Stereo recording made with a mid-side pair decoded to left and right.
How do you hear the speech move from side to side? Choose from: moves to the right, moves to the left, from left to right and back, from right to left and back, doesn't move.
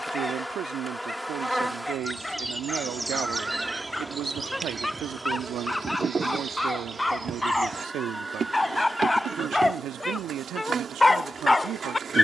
doesn't move.